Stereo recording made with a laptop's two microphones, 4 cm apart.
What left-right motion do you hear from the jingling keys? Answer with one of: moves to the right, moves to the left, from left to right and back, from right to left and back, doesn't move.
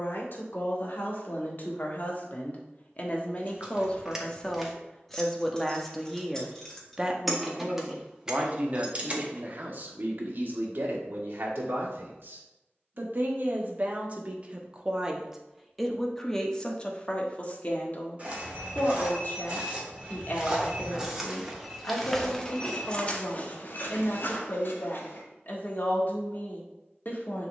from right to left and back.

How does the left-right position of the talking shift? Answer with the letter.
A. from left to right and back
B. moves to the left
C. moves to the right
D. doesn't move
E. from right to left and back
A.